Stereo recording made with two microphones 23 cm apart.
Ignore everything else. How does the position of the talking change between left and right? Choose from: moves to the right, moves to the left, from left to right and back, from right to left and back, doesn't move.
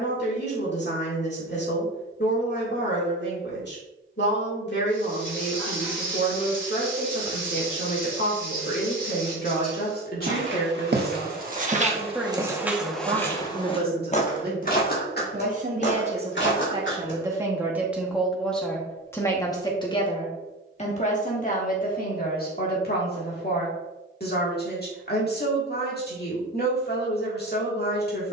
from left to right and back.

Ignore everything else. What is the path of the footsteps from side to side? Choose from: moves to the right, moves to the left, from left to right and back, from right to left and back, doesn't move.
moves to the left.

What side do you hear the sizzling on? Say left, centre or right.
left.